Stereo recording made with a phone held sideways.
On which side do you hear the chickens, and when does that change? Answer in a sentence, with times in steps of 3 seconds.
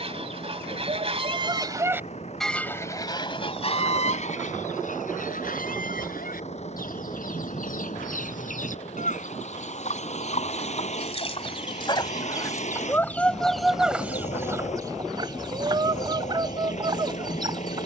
In this clip you hear the chickens on the right from 0 s, on the left from 3 s, in the centre from 12 s and on the right from 15 s.